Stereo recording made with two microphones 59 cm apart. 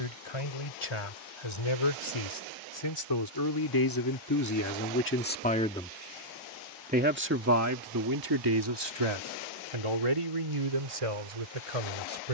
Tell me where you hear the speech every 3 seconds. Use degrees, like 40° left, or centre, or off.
50° left, 30° left, 30° right, 60° right.